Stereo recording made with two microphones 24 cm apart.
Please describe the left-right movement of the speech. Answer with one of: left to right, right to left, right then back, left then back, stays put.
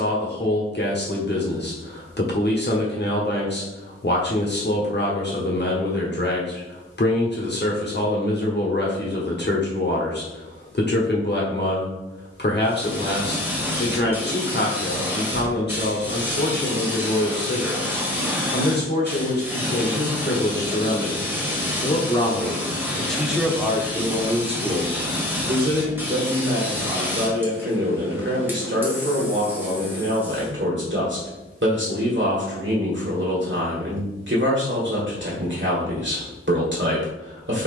left to right.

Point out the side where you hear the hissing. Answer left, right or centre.
centre.